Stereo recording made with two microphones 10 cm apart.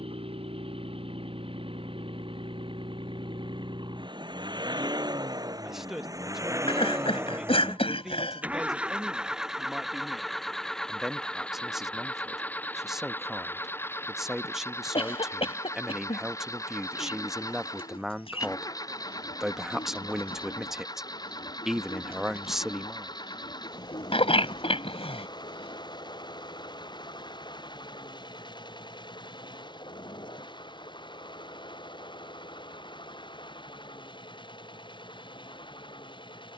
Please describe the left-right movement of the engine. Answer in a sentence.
You can hear the engine move from right to left.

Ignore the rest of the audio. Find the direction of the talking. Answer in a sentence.
In this clip you hear the talking in the centre.